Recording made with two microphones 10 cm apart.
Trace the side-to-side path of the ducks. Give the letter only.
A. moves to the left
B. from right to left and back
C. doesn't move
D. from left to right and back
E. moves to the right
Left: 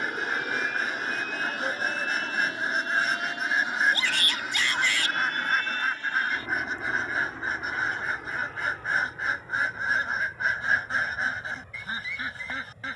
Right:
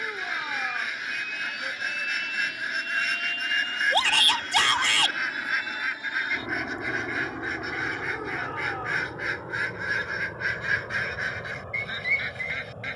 C.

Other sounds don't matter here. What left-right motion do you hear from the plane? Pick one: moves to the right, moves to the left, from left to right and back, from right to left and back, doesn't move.
moves to the right.